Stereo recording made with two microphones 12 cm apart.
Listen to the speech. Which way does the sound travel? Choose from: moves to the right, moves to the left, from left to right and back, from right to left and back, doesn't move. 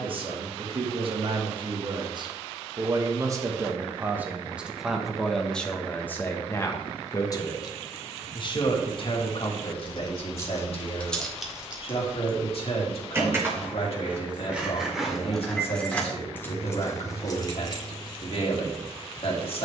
moves to the left.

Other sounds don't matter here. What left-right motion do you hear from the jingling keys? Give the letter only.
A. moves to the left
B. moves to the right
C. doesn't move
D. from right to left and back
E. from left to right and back
E.